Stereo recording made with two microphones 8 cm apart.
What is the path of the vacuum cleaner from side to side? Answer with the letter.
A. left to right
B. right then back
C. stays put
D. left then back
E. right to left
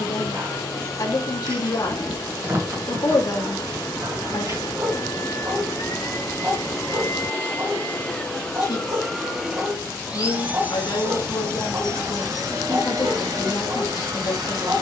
A.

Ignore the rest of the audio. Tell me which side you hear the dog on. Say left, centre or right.
right.